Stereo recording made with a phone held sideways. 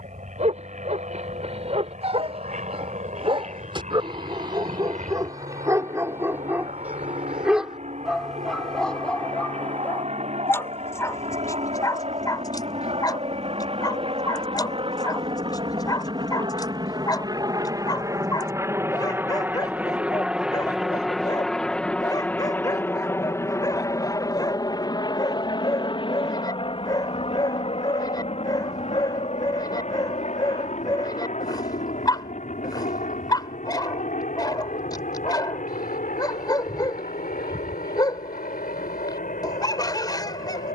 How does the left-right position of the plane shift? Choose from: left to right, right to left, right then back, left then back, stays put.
right to left.